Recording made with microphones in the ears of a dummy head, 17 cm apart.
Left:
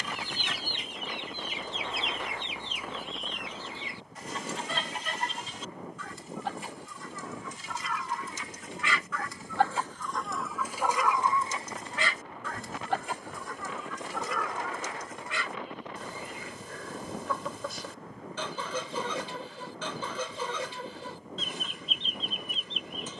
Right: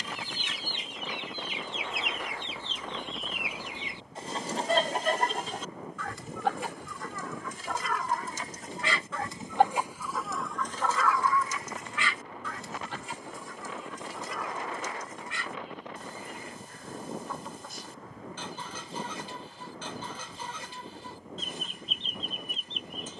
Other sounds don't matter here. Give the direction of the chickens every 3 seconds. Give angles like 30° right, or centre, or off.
40° left, 30° right, 50° right, centre, 60° left, 70° left, 70° left, 70° left.